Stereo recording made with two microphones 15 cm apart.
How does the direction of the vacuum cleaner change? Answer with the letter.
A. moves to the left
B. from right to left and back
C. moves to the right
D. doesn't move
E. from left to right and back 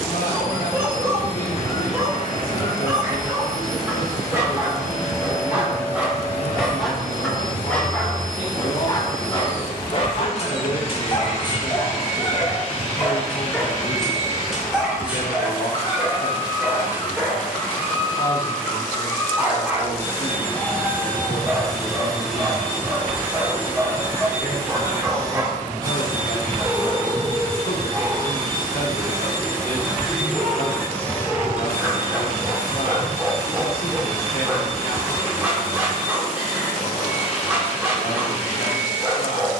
E.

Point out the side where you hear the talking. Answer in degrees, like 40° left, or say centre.
70° left.